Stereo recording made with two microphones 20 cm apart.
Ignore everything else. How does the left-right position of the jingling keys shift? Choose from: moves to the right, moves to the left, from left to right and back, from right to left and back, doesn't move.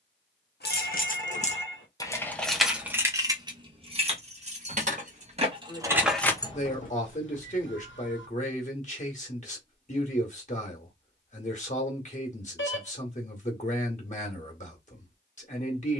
from left to right and back.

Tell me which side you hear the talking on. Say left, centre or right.
left.